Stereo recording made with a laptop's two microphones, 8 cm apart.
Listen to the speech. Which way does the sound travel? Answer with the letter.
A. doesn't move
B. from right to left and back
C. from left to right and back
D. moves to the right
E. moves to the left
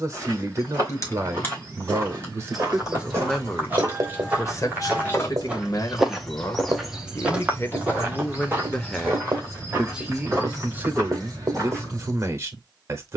B.